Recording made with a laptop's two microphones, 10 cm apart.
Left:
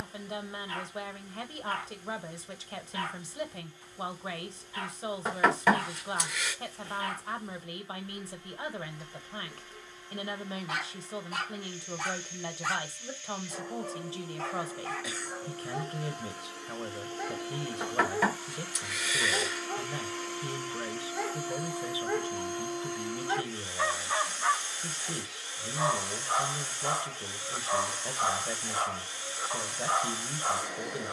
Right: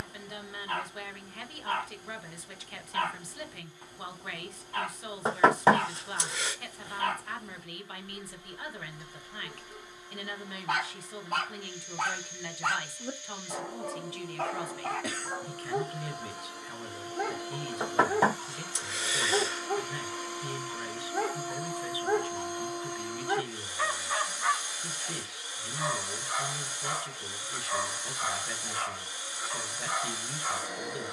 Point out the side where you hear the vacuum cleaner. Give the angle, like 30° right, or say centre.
10° right.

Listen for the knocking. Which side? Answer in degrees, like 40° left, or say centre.
30° right.